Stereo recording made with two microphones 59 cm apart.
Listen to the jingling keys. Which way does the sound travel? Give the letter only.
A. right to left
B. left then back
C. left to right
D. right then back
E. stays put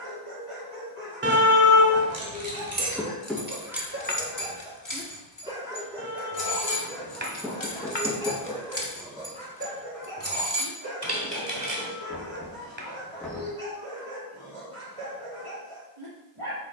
B.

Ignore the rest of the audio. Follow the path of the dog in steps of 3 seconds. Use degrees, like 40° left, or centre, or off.
50° right, 20° right, centre, 40° right, 60° right, 60° right.